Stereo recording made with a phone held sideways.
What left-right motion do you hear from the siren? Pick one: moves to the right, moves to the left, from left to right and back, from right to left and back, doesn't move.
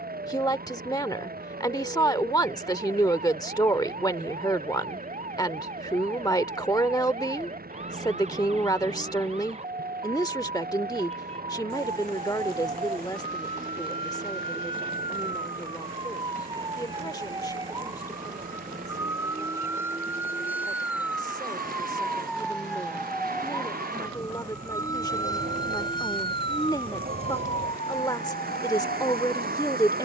moves to the left.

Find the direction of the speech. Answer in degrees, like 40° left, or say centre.
20° left.